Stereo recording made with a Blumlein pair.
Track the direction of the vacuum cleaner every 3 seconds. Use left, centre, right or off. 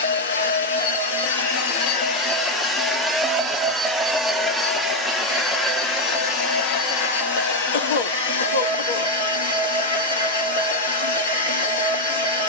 left, centre, left, left.